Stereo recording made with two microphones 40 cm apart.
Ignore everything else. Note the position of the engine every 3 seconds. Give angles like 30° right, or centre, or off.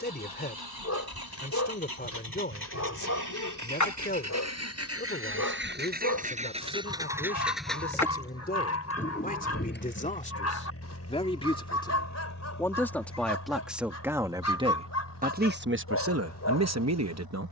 60° right, 40° right, centre, 30° left, 50° left, 60° left.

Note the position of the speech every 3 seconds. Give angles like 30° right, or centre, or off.
20° left, 20° left, 20° left, 20° left, centre, 40° right.